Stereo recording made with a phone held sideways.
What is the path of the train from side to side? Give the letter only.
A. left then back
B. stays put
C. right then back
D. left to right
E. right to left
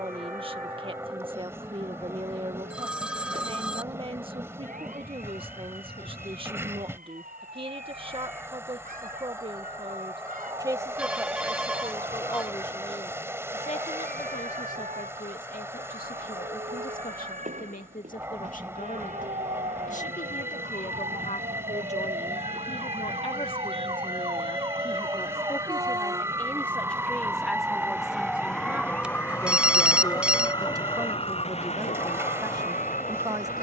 B.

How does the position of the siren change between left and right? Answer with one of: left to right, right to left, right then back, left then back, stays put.
right to left.